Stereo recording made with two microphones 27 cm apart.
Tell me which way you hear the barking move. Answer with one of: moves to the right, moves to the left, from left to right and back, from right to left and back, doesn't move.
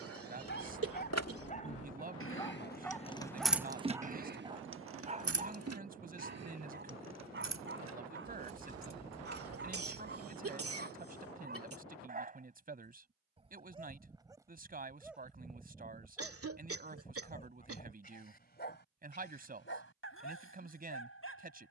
from left to right and back.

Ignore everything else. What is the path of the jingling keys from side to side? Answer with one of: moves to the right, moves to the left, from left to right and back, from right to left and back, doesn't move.
moves to the right.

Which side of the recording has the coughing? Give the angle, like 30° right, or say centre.
60° right.